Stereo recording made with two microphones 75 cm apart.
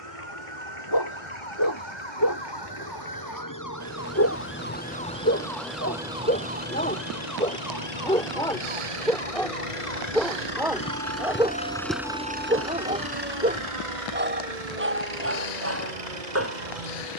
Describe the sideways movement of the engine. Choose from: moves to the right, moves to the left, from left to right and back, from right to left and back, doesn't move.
moves to the right.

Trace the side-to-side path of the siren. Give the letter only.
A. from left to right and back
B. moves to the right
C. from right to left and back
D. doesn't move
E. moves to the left
B.